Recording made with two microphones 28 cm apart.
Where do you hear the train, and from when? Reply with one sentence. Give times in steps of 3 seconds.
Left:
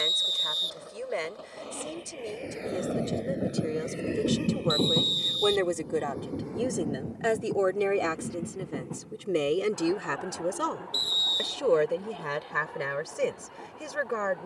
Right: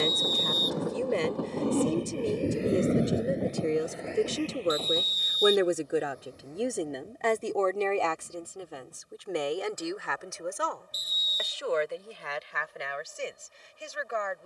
In this clip you hear the train on the right from 0 s and on the left from 3 s.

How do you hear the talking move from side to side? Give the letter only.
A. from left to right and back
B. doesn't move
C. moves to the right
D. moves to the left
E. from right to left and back
D.